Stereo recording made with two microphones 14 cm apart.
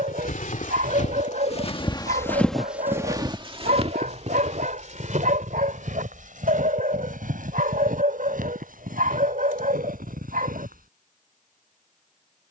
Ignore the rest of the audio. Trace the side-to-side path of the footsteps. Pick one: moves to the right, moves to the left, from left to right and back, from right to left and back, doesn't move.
moves to the right.